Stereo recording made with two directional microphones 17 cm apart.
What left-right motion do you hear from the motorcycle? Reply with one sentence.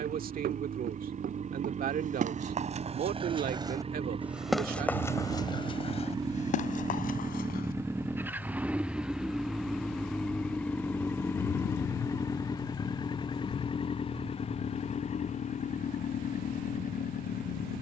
You can hear the motorcycle move from right to left.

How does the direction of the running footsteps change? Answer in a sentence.
In this clip you hear the running footsteps move to the left.